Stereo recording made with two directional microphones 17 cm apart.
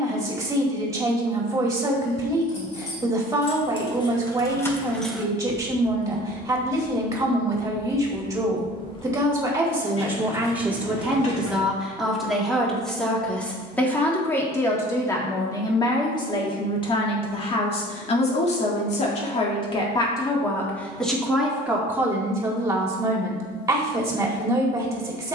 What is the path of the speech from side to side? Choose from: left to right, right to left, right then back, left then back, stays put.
left then back.